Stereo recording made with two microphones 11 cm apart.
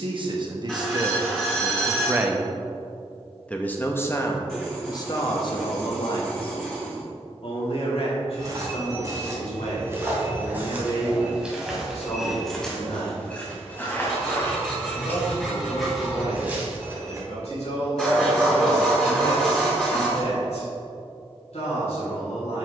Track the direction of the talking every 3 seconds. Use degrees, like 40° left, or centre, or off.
30° right, 30° left, 60° left, 70° left, 70° left, 80° left, 80° left, 80° left.